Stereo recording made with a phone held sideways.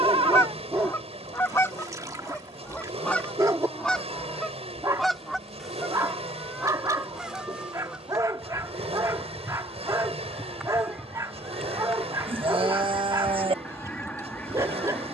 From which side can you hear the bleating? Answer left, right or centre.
right.